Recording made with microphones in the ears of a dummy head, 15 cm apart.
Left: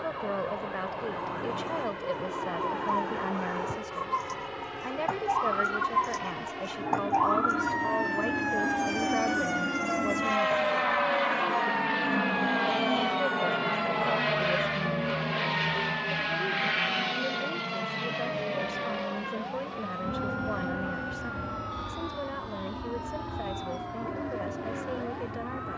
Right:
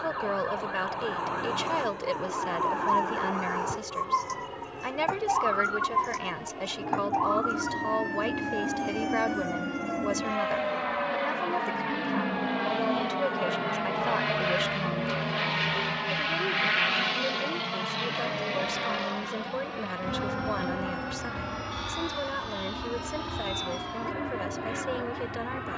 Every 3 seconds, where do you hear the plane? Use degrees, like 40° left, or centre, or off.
60° left, 50° left, 40° left, 30° left, 10° left, 20° right, 40° right, 60° right, 60° right.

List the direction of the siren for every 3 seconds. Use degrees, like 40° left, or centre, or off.
40° right, 20° right, 20° left, 50° left, 60° left, 70° left, 80° left, 80° left, 80° left.